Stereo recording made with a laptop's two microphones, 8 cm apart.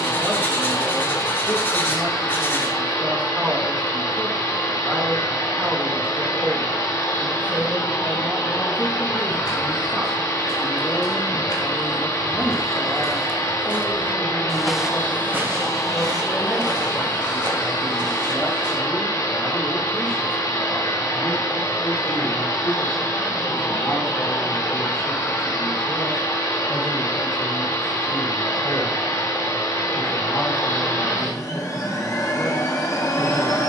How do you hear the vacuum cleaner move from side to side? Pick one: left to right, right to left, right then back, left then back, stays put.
stays put.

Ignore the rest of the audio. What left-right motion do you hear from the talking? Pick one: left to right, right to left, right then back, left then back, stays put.
right to left.